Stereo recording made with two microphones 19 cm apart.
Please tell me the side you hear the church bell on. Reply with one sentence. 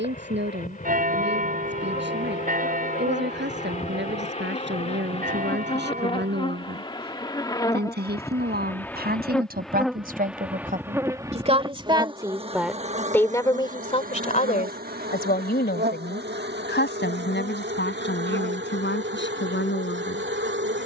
You can hear the church bell on the right.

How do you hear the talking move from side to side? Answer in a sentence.
In this clip you hear the talking move from right to left.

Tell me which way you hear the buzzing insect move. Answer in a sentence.
In this clip you hear the buzzing insect go from the left side to the right.